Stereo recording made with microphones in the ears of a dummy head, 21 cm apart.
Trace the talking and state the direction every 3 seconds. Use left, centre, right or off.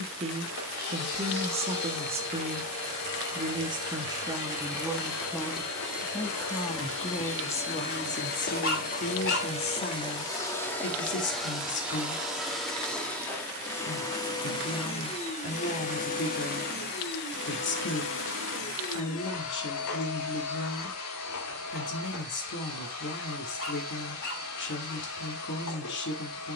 right, centre, left, left, left, left, left, left, left.